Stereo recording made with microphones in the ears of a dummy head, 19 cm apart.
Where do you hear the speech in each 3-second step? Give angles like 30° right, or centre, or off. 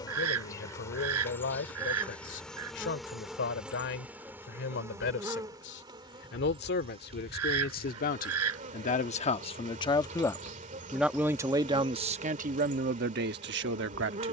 60° left, 60° left, 50° left, 10° left, 50° right.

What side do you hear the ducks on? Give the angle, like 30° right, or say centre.
80° right.